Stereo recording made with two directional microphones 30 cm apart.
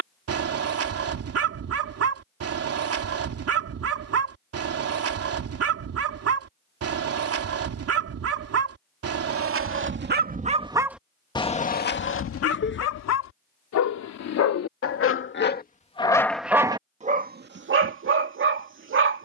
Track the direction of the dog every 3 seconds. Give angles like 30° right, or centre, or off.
50° right, 50° right, 50° right, 20° right, 60° left, centre, 40° right.